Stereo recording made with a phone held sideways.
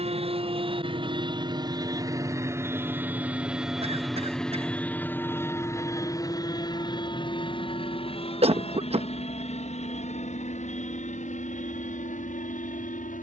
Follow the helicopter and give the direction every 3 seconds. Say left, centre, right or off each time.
right, centre, left, left, left.